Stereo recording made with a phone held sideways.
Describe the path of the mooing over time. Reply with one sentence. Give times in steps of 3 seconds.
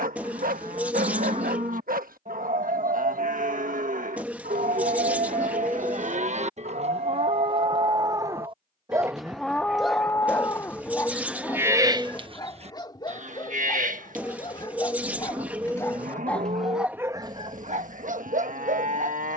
In this clip you hear the mooing on the right from 0 s, in the centre from 9 s and on the right from 12 s.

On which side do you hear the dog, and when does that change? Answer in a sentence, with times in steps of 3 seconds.
In this clip you hear the dog on the right from 0 s, in the centre from 9 s, on the left from 12 s, in the centre from 15 s and on the right from 18 s.